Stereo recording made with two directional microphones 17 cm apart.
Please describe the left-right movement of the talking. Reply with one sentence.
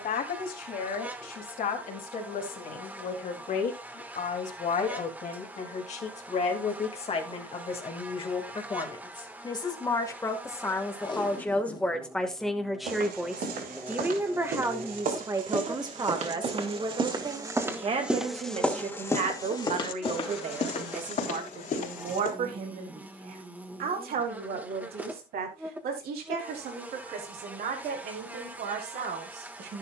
You can hear the talking move to the right.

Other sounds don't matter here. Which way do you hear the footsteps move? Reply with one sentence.
You can hear the footsteps go from the right side to the left.